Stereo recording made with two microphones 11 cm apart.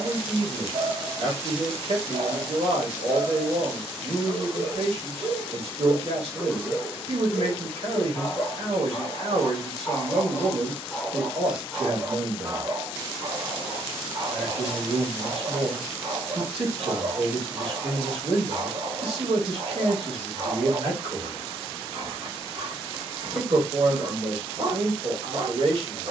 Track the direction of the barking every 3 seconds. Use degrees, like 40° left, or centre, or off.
50° right, 40° right, 20° left, 10° left, 40° right, 40° right, 40° right, 40° right, 40° right.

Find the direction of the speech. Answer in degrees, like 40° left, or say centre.
60° right.